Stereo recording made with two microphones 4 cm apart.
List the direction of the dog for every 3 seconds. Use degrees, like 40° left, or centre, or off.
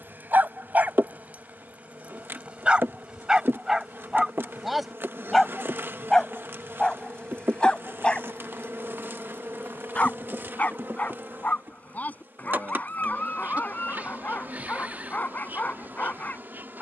30° right, 10° right, 20° left, 40° left, 40° left, 40° left.